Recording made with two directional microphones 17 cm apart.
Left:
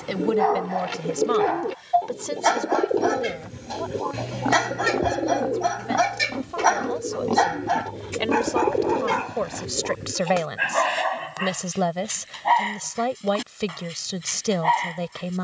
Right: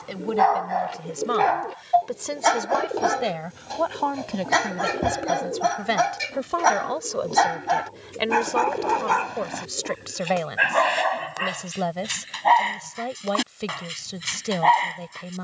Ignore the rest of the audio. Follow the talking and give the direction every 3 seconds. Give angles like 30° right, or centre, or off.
centre, 60° right, 20° right, 20° left, 20° left.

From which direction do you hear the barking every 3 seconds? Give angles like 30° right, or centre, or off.
20° right, centre, 10° right, 30° right, 40° right.